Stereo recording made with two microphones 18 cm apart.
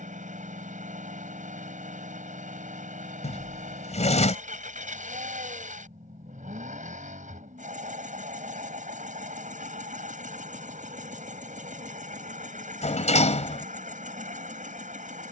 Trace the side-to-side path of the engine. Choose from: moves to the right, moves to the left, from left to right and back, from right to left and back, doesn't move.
doesn't move.